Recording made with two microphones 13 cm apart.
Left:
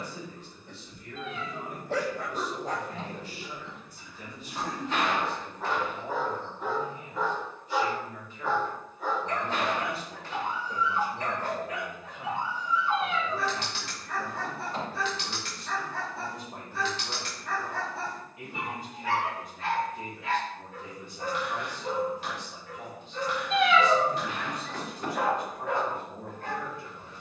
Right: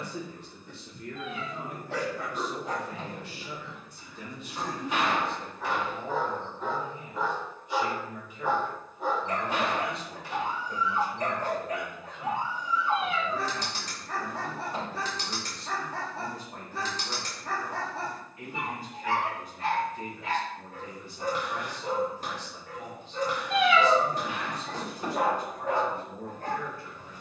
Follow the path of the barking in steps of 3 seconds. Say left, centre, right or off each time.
left, left, centre, right, right, right, right, right, right.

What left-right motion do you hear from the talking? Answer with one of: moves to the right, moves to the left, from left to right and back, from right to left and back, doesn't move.
moves to the left.